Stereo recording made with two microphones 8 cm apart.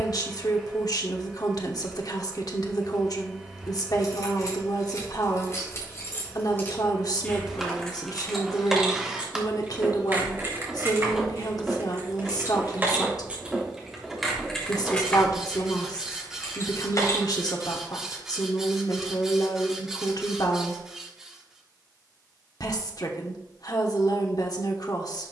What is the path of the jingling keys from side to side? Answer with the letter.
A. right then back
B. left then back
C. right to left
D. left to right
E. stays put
A.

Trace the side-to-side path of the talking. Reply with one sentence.
You can hear the talking stay in one place.